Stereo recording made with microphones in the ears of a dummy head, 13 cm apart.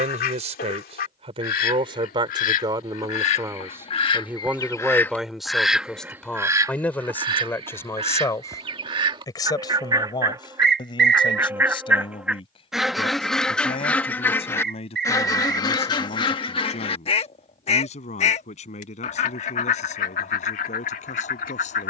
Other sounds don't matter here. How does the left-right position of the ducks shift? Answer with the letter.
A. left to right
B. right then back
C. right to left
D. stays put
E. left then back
B.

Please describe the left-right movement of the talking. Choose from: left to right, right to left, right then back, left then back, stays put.
right to left.